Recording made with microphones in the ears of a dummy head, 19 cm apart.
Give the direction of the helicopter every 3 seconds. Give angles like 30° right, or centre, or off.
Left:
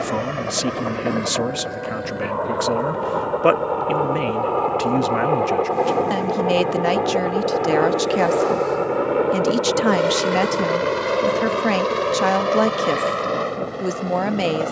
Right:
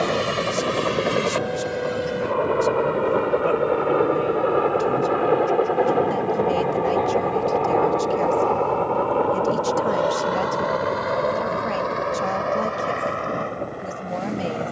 40° right, 20° right, 10° left, 30° left, 50° left.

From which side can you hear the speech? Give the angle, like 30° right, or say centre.
80° left.